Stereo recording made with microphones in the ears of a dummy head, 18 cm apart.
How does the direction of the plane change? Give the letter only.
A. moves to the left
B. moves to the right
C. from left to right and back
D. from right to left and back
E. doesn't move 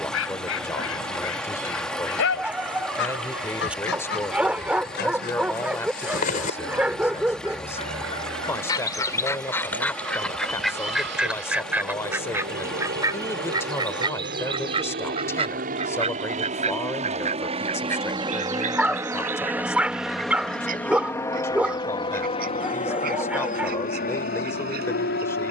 A.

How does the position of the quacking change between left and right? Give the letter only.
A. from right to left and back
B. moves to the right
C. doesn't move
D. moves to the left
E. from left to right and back
B.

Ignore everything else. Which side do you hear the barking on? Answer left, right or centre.
centre.